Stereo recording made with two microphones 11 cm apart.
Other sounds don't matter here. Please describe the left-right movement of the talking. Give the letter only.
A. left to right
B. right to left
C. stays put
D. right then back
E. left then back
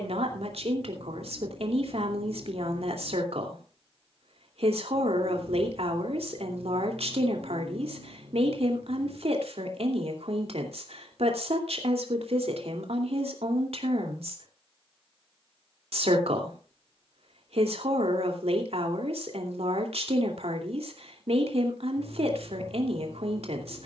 C.